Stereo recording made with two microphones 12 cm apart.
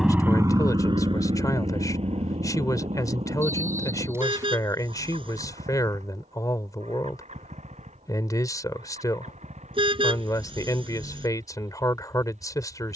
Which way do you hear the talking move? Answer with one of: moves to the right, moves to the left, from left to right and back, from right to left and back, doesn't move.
doesn't move.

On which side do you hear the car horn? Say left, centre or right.
right.